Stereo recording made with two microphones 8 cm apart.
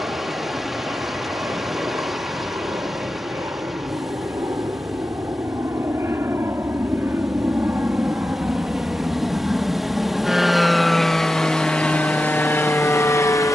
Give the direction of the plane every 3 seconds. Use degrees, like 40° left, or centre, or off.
50° right, 40° right, 30° right, centre, 30° left.